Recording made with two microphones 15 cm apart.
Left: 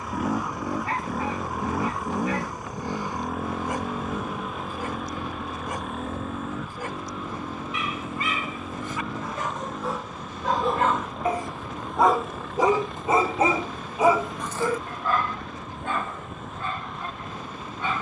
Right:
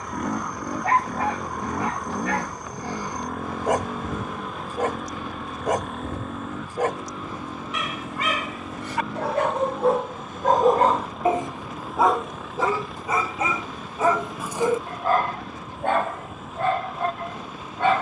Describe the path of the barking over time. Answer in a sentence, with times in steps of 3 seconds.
You can hear the barking on the right from 0 s, in the centre from 12 s and on the right from 15 s.